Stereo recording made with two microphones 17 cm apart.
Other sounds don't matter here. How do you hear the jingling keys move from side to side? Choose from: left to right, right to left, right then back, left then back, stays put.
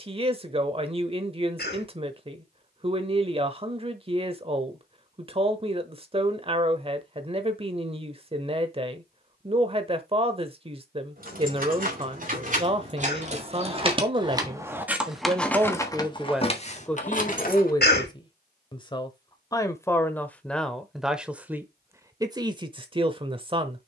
right to left.